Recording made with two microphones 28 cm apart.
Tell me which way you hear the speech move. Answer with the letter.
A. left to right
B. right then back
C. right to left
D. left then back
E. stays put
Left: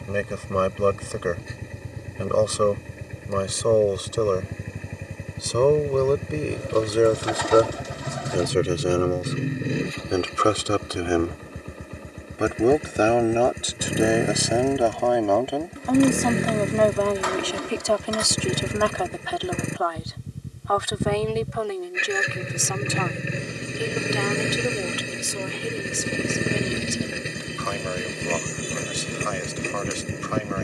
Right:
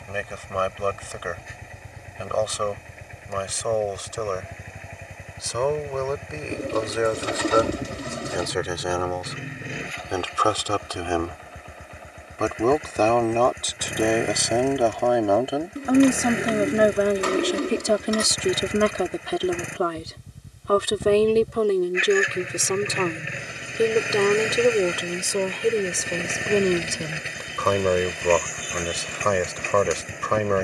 A.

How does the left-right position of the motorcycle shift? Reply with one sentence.
You can hear the motorcycle stay put.